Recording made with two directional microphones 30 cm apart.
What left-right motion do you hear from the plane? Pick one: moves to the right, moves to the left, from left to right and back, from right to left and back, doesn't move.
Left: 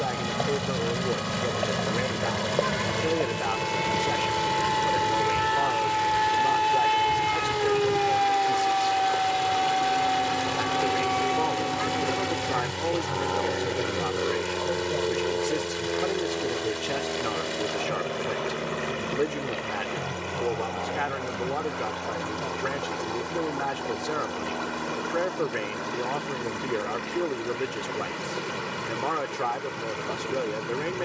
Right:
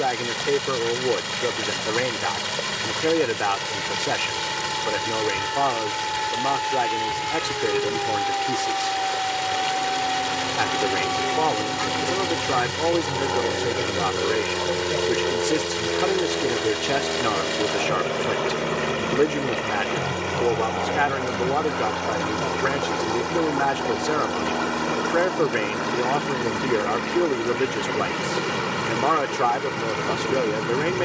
moves to the right.